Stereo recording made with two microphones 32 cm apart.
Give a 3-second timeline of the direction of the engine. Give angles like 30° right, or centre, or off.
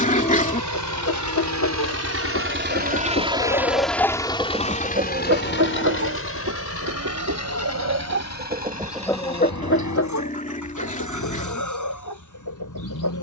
50° right, 10° left, 50° left, 60° left, 60° left.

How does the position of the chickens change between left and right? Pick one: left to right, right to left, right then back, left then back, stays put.
right then back.